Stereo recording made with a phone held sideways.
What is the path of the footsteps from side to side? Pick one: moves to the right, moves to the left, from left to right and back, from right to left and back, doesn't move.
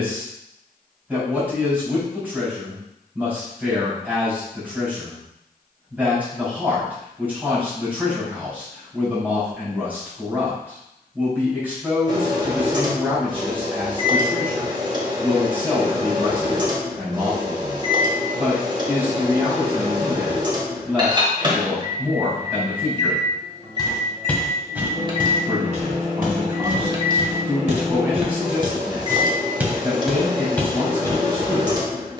from left to right and back.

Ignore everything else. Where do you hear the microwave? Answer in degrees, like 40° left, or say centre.
30° right.